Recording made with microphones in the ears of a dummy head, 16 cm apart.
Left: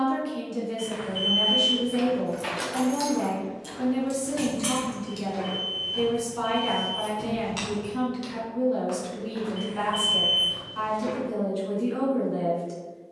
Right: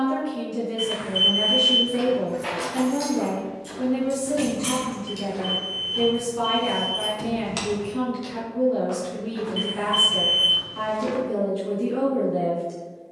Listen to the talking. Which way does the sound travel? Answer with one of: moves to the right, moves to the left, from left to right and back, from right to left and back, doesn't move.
doesn't move.